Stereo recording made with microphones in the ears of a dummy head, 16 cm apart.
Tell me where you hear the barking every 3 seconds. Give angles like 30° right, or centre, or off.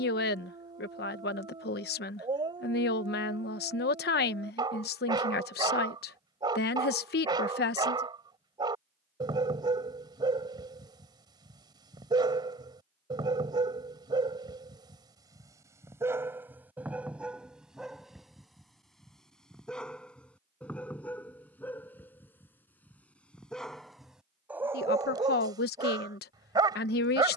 30° right, 30° right, 30° right, 30° right, 30° right, 10° right, centre, 10° left, 20° right.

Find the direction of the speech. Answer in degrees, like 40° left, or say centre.
60° left.